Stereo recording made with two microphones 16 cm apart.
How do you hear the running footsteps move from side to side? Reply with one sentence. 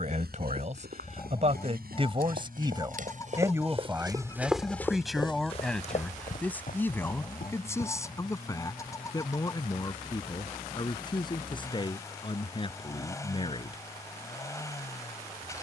In this clip you hear the running footsteps move from right to left.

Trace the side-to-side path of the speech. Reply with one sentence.
In this clip you hear the speech travel towards the left.